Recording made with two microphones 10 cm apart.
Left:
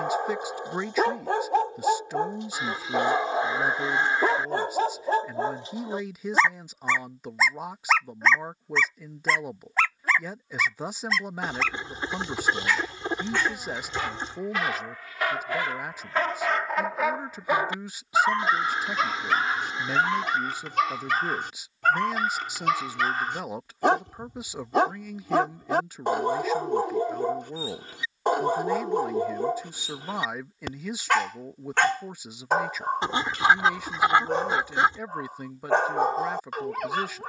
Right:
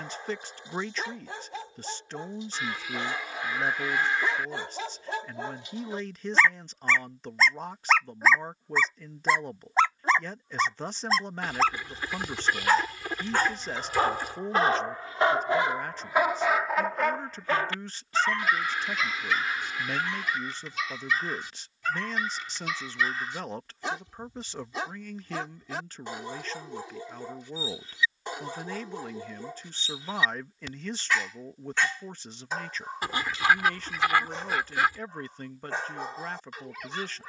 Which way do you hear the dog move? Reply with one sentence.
In this clip you hear the dog move from left to right and back again.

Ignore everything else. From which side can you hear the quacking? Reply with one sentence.
You can hear the quacking on the left.